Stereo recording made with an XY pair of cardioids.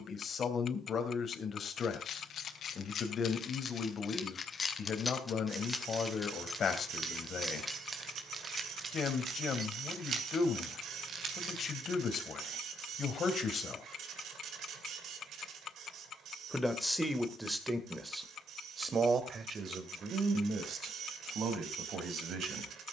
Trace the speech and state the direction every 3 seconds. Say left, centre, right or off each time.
left, left, left, left, left, centre, right, right.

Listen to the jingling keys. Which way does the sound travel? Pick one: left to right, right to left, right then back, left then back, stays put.
left to right.